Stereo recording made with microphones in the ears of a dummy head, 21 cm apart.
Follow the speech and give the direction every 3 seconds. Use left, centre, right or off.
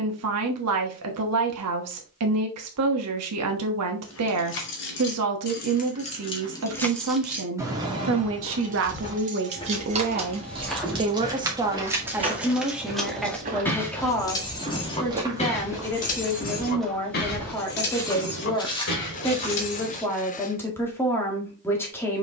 right, right, right, right, centre, centre, centre, centre.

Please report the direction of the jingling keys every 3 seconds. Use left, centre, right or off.
off, left, centre, right, centre, left, left, off.